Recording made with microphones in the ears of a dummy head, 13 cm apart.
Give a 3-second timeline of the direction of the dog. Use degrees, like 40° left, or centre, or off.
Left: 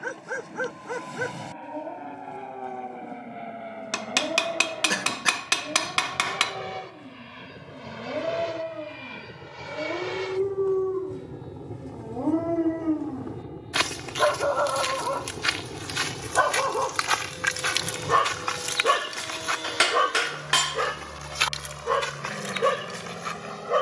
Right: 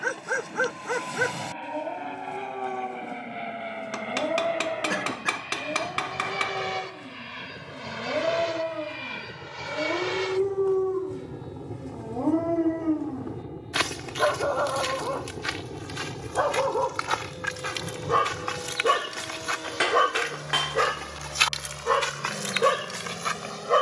40° right, 40° right, 40° right, 20° right, 10° left, 60° left, 20° left, 30° right.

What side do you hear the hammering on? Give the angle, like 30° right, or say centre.
80° left.